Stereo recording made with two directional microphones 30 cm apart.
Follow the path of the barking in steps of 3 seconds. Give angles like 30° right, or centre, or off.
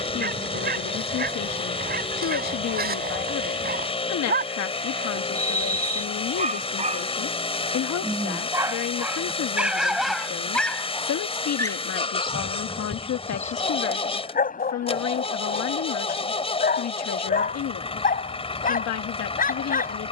30° right, 30° right, 20° right, centre, 30° left, 30° left, 30° left.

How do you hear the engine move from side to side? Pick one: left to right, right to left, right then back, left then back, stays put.
stays put.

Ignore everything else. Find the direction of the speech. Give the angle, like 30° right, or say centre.
60° left.